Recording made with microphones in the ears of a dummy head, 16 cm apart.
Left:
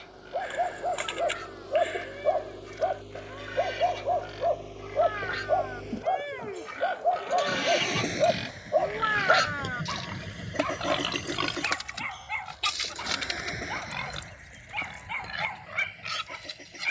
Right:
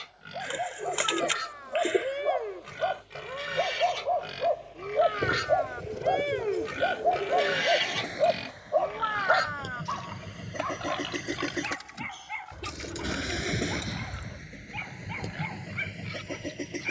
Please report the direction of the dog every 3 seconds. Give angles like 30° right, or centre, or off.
50° left, centre, 10° right, 40° left, 60° left, 60° left.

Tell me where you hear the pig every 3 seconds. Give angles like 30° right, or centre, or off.
70° right, 60° right, 20° right, 50° left, 70° left, 80° left.